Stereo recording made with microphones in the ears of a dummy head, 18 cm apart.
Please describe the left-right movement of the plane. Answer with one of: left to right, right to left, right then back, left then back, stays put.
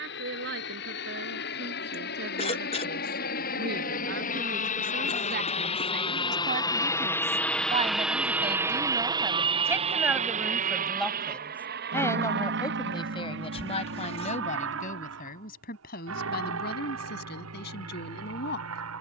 left to right.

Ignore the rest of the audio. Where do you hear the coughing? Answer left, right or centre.
left.